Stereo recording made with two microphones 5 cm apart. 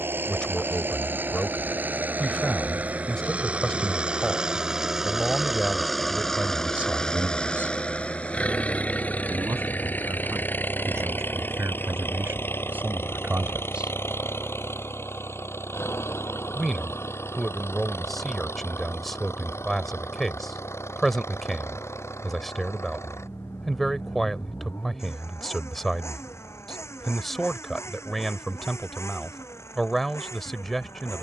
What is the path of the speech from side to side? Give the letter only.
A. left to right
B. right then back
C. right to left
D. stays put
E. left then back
B.